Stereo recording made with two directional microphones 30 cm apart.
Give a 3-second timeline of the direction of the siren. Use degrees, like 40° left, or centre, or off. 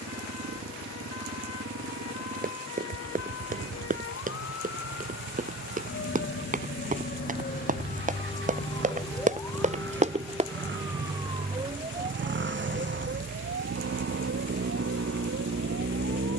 60° left, 50° left, 30° left, centre, 40° right, 50° right.